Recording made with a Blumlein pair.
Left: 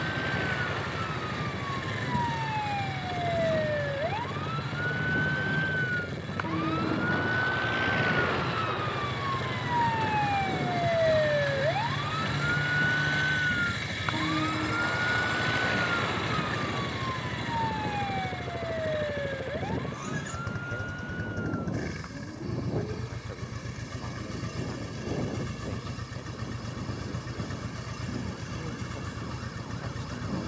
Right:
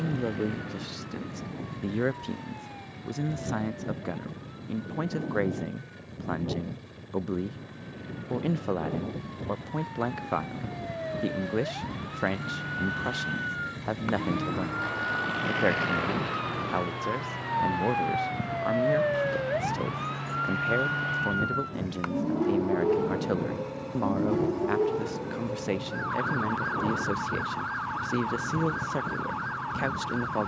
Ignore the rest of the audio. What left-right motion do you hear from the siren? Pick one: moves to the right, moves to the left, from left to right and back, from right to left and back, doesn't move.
moves to the right.